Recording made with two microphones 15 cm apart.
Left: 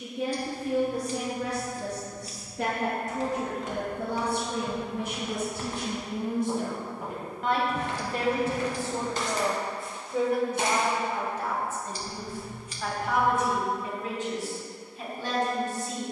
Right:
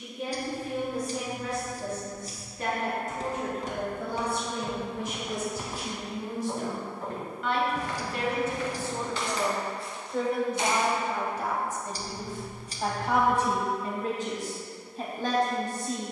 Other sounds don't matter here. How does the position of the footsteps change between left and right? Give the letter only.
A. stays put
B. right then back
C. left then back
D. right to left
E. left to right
D.